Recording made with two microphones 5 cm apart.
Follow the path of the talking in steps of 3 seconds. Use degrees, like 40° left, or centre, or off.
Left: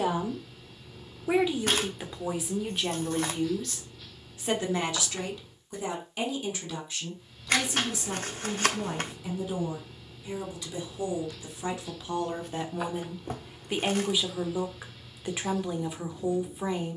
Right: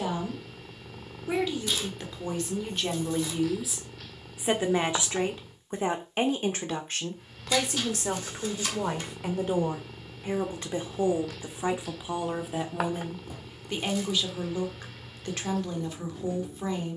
10° left, 20° right, 50° right, 40° right, centre, 10° left.